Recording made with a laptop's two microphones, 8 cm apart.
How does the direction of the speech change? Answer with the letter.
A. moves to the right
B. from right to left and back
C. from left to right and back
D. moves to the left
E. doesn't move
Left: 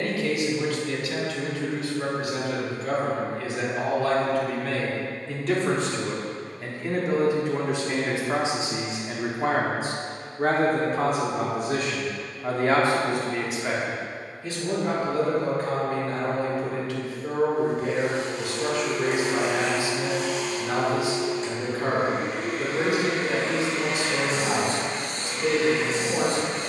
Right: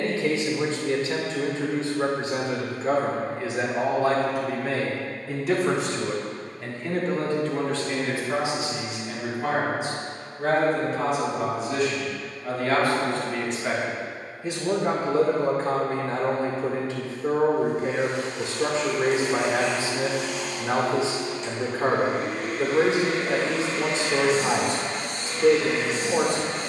B.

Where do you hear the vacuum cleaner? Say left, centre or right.
left.